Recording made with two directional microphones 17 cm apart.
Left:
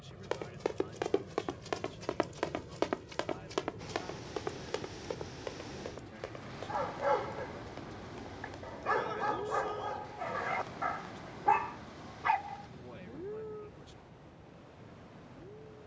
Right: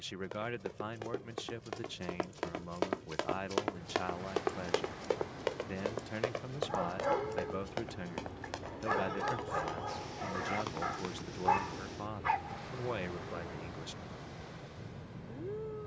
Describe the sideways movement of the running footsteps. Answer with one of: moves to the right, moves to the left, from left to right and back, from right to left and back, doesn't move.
moves to the right.